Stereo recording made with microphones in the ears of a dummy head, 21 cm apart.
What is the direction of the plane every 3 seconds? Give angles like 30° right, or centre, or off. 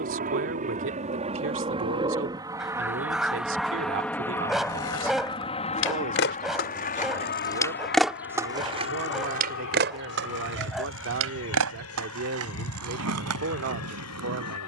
30° right, 10° left, 40° left, 60° left, 70° left.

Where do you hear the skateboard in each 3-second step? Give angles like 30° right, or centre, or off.
off, 60° left, 10° left, 50° right, 70° right.